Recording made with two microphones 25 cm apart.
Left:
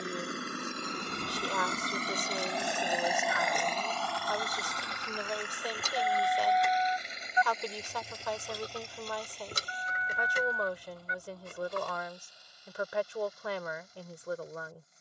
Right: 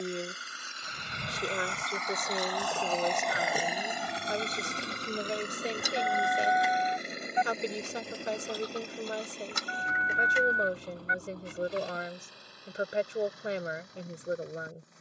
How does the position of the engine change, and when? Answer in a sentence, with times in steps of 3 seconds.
You can hear the engine on the left from 0 s and on the right from 3 s.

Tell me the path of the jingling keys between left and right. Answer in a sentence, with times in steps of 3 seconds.
You can hear the jingling keys on the right from 0 s, in the centre from 6 s, on the left from 9 s and not at all from 12 s.